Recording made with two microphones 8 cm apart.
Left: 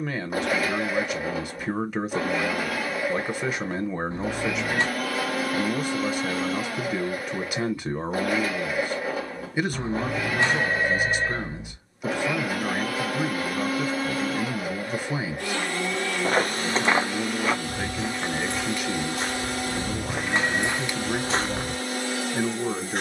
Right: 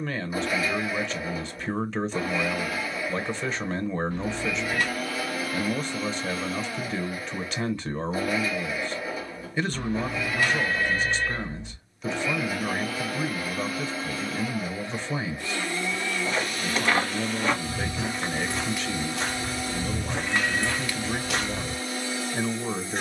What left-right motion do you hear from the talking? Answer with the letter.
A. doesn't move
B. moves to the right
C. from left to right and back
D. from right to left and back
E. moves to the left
A.